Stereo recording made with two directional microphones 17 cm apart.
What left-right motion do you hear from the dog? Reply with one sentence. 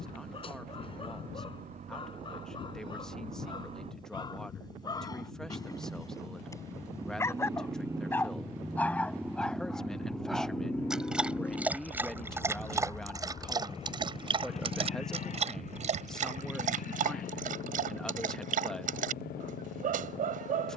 In this clip you hear the dog travel towards the right.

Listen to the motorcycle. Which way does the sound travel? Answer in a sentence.
In this clip you hear the motorcycle move to the left.